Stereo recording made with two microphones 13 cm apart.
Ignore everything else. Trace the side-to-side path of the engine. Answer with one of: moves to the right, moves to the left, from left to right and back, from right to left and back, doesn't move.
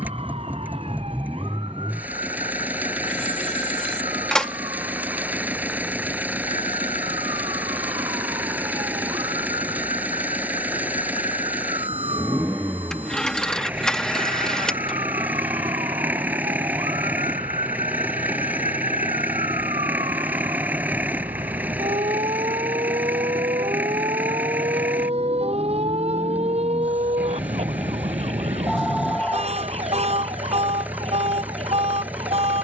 doesn't move.